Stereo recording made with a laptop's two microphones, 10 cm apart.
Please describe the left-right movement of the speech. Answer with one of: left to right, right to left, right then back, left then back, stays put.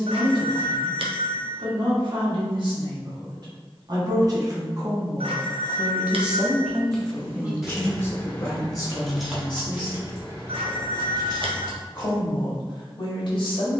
right to left.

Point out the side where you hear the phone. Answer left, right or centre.
right.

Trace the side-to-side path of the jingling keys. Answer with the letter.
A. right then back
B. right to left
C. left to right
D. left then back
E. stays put
D.